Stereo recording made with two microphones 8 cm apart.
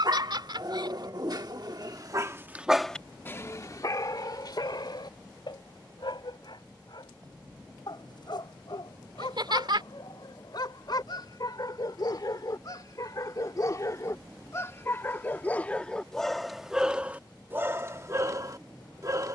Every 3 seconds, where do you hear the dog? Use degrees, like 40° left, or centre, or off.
40° right, 50° left, 60° left, 60° left, 40° left, centre, 40° right.